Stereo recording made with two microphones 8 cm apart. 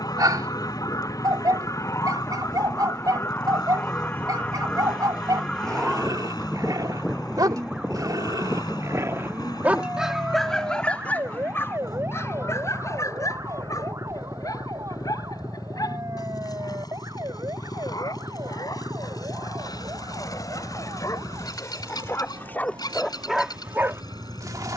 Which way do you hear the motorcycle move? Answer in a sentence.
In this clip you hear the motorcycle stay put.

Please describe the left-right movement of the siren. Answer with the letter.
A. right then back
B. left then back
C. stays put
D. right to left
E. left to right
E.